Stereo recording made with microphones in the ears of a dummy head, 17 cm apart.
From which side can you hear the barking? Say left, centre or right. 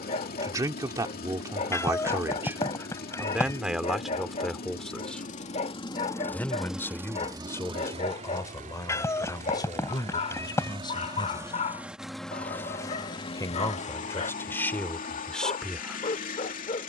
left.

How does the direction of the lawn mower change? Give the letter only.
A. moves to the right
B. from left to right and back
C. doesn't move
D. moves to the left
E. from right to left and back
B.